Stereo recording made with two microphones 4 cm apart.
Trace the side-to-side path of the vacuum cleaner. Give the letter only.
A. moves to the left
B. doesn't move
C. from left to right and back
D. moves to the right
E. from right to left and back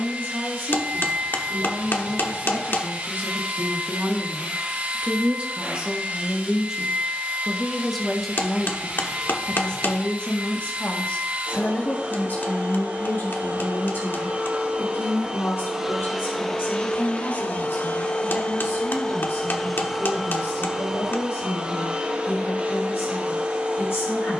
E.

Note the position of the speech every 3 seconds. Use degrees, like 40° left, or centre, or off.
60° right, 40° right, centre, 30° left, 50° left, 70° left, 70° left, 80° left.